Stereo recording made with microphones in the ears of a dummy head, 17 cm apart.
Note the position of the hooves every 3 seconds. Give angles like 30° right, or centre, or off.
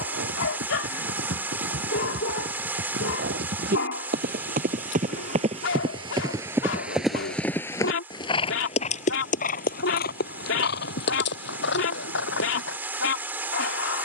70° right, 40° right, 10° left, 50° left, 70° left.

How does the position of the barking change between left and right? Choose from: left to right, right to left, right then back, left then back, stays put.
stays put.